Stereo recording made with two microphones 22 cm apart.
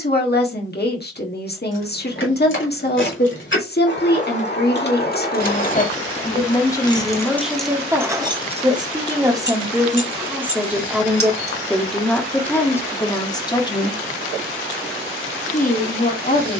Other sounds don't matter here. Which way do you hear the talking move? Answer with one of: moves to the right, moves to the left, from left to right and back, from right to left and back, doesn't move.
from left to right and back.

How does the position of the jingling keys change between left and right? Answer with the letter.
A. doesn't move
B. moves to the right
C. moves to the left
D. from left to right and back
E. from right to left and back
B.